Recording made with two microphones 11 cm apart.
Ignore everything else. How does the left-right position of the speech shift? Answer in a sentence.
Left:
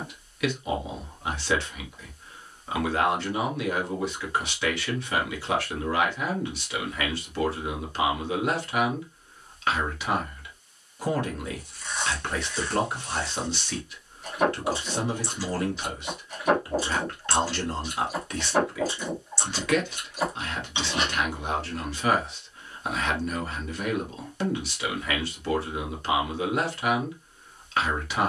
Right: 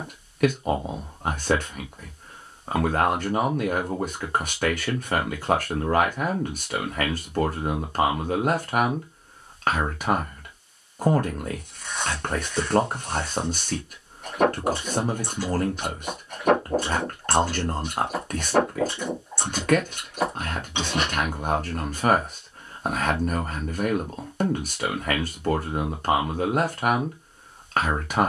In this clip you hear the speech stay put.